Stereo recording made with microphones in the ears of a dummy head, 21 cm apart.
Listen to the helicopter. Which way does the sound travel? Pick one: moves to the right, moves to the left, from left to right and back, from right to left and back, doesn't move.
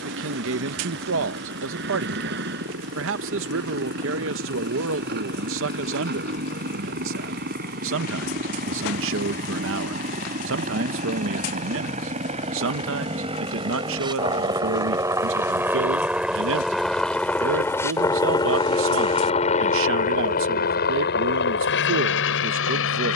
moves to the left.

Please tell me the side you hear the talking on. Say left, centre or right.
right.